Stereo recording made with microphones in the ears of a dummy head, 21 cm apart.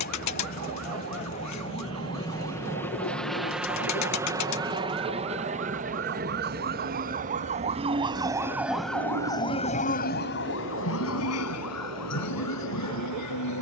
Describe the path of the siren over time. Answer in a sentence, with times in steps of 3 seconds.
You can hear the siren on the right from 0 s and on the left from 9 s.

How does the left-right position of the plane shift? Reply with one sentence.
You can hear the plane move from left to right.